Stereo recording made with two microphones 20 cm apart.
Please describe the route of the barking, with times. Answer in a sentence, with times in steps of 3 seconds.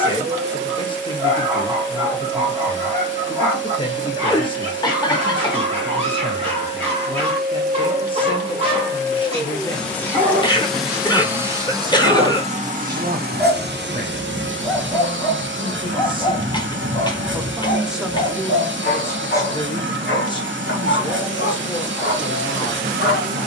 In this clip you hear the barking on the right from 0 s, in the centre from 12 s and on the left from 15 s.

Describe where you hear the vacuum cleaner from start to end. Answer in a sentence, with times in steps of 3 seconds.
In this clip you hear the vacuum cleaner on the right from 0 s, in the centre from 9 s and on the right from 12 s.